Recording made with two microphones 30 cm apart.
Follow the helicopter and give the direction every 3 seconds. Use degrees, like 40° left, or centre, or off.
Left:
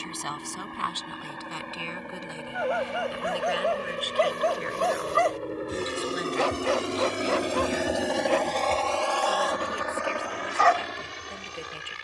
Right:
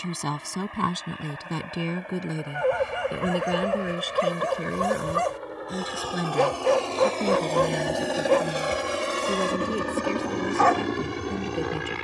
50° left, 40° left, 10° left, 50° right.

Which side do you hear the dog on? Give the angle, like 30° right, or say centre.
60° right.